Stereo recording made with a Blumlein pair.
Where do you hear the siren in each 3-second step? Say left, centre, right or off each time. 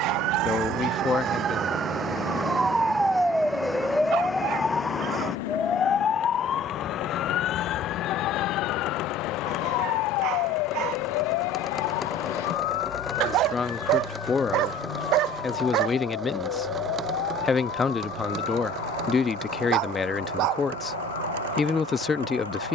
right, centre, left, left, left, left, left, left.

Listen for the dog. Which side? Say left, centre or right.
right.